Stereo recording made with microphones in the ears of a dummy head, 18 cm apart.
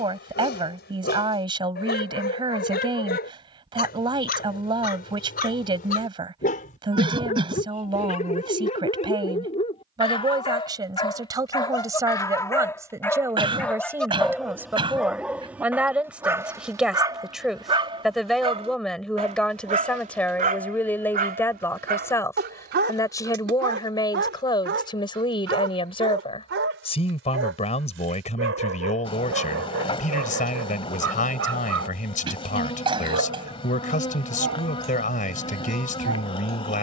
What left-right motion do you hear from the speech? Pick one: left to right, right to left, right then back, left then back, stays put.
right to left.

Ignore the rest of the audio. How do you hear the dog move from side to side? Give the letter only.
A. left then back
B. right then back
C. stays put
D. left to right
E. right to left
D.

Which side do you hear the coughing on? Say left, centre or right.
right.